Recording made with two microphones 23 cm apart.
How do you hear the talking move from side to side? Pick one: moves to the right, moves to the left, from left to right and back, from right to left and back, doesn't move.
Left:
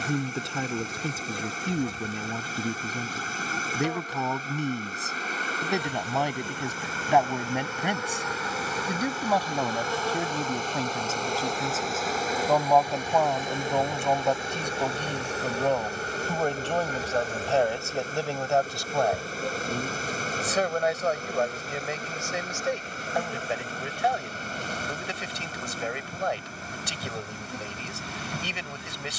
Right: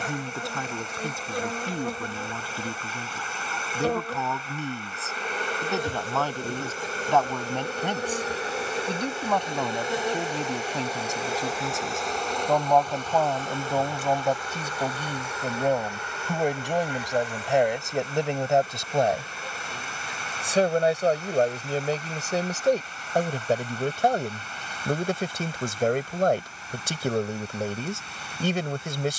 moves to the right.